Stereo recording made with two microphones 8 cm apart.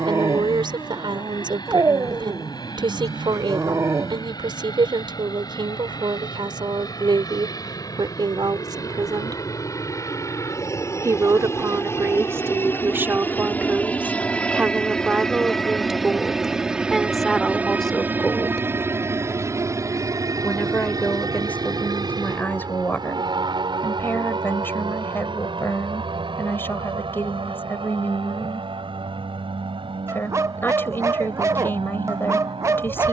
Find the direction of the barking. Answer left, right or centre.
right.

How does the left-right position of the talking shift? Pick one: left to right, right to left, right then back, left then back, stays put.
right to left.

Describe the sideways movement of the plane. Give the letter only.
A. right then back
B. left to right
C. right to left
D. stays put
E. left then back
B.